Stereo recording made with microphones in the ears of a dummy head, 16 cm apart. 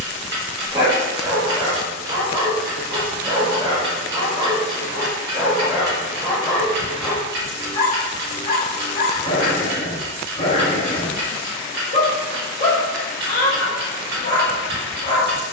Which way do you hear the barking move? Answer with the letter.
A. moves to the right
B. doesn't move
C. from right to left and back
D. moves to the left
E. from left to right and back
D.